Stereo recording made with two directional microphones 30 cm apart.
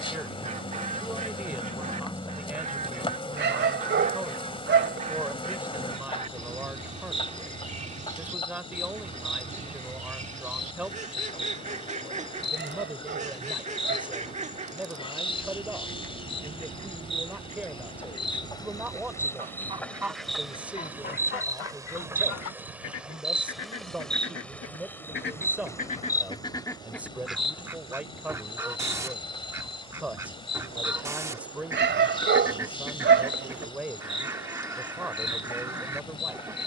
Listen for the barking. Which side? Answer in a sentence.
In this clip you hear the barking on the right.